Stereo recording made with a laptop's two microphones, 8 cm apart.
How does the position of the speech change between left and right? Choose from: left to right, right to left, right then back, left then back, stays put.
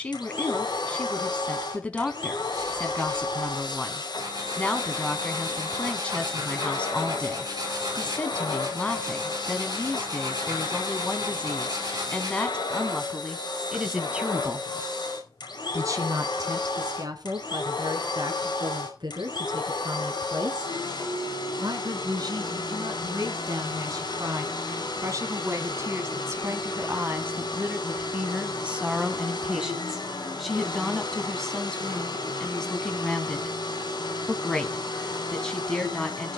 right then back.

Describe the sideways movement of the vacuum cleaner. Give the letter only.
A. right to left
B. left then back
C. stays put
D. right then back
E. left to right
C.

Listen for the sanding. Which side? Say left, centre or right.
right.